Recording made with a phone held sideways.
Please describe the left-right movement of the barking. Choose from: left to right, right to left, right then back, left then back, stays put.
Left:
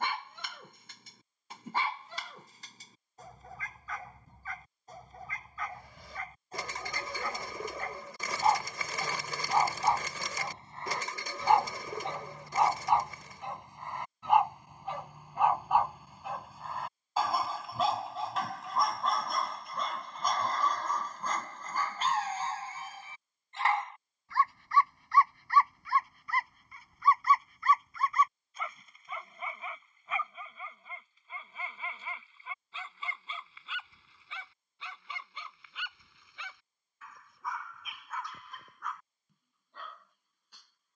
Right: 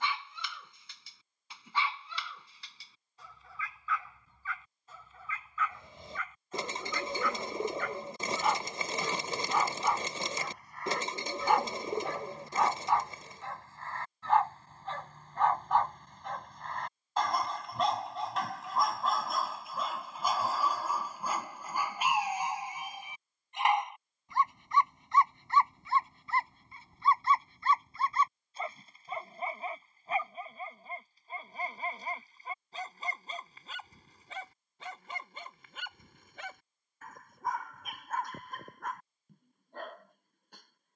left to right.